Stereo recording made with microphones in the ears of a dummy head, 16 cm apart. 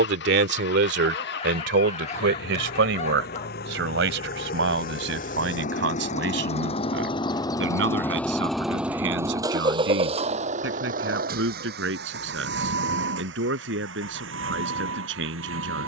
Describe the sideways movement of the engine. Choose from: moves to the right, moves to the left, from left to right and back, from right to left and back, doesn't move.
moves to the right.